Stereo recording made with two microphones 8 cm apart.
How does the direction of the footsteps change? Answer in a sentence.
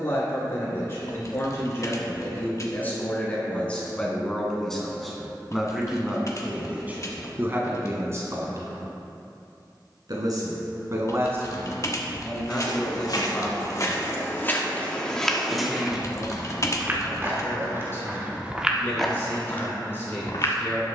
You can hear the footsteps go right and come back.